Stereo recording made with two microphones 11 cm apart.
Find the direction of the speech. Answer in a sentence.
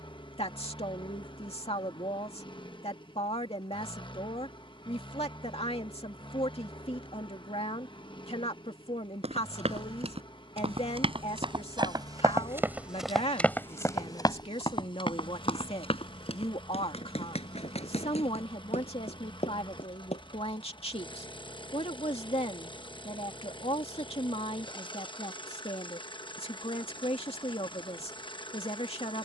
You can hear the speech on the left.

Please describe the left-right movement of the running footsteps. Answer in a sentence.
In this clip you hear the running footsteps go from the right side to the left.